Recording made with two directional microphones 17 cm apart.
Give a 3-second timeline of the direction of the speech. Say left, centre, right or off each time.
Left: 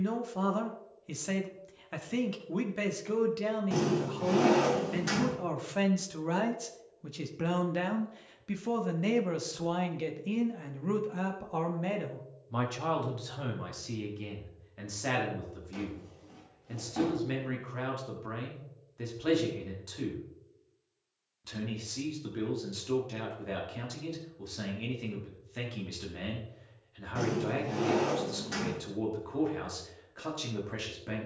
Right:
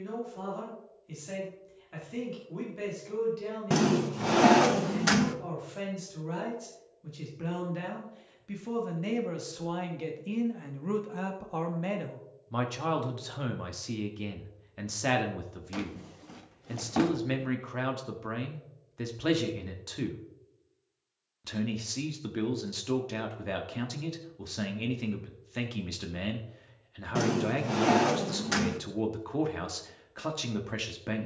left, left, left, centre, right, right, right, right, right, right, right.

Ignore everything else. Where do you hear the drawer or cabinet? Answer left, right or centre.
right.